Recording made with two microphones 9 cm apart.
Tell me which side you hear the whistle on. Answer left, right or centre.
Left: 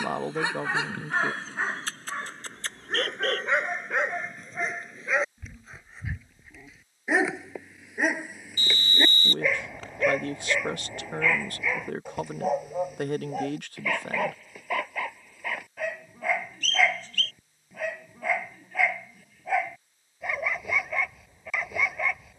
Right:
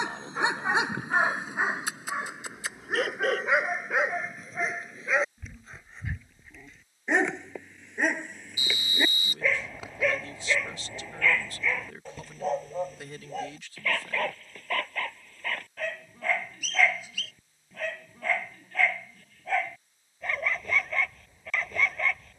centre.